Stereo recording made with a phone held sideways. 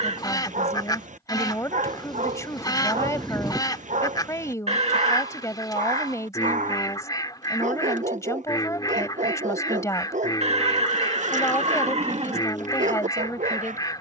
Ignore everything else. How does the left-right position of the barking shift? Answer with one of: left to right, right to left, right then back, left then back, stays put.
stays put.